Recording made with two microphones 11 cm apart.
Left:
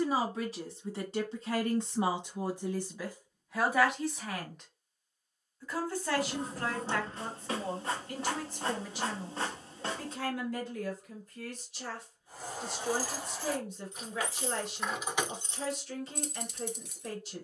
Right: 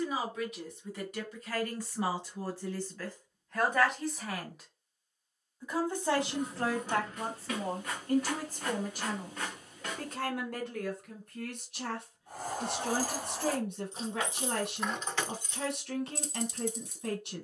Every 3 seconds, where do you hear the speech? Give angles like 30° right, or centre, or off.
30° left, centre, 40° right, 60° right, 60° right, 60° right.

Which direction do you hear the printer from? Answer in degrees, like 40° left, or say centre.
30° left.